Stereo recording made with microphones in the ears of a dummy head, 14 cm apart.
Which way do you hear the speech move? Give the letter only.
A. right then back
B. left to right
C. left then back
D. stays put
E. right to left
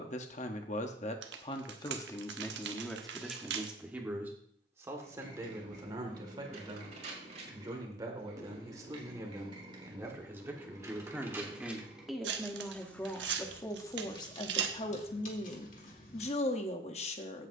A.